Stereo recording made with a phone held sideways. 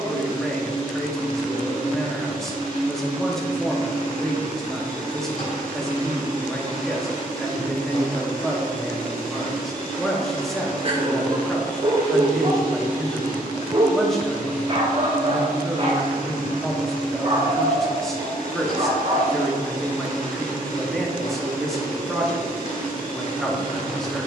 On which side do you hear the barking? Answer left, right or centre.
right.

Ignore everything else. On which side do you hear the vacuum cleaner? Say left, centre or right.
left.